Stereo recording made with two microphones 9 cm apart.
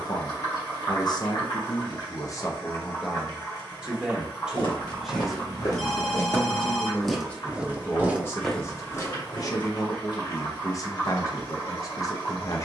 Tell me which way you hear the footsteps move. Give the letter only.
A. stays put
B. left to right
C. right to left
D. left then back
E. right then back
E.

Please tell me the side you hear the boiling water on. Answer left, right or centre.
left.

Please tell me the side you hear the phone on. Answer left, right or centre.
centre.